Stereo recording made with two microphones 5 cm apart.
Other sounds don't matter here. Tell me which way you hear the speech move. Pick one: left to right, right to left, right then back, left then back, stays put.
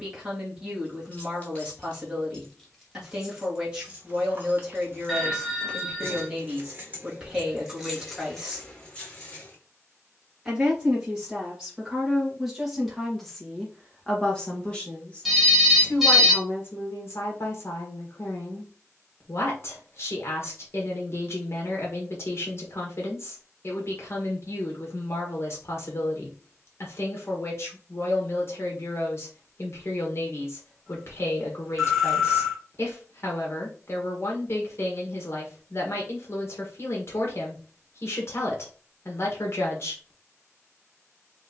right to left.